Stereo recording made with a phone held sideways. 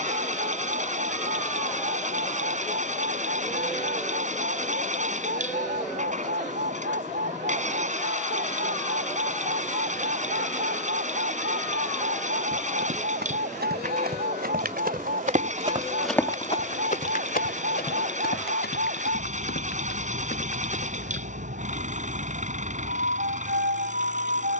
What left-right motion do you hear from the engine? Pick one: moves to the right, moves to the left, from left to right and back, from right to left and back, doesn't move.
doesn't move.